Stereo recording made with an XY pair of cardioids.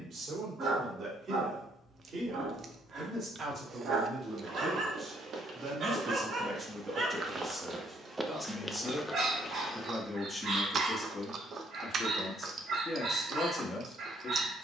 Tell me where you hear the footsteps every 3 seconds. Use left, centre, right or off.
off, right, right, left, off.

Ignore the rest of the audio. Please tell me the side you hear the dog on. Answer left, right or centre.
right.